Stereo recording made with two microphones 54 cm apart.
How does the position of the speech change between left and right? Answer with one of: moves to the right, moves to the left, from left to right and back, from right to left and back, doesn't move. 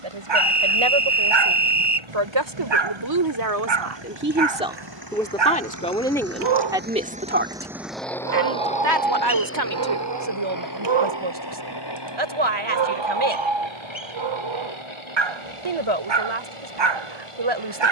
from right to left and back.